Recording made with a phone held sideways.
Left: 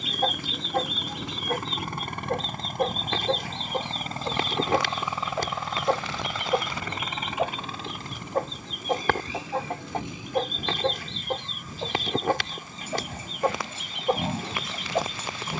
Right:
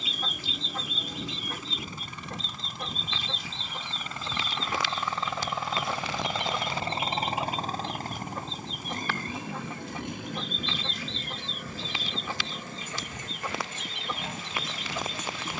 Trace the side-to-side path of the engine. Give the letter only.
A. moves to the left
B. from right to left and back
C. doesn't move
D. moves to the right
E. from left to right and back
D.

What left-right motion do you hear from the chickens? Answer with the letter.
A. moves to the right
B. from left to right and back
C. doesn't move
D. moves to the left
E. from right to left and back
C.